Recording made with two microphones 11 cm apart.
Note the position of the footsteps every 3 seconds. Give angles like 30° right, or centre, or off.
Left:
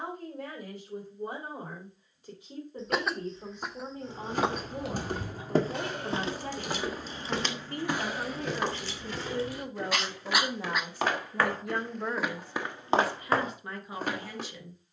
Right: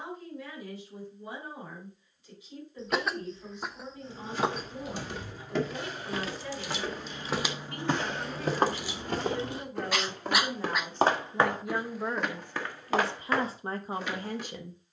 off, 40° left, 10° right, 40° right, 30° left.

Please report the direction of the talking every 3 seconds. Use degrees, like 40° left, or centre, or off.
50° left, 50° left, 40° left, 10° left, 30° right.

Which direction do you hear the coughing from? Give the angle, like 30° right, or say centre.
centre.